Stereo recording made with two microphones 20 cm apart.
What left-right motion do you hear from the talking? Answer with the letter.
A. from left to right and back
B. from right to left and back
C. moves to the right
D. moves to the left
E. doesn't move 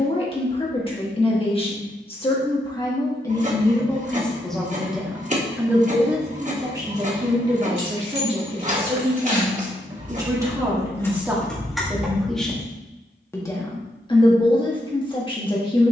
A.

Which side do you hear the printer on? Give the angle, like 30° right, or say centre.
40° right.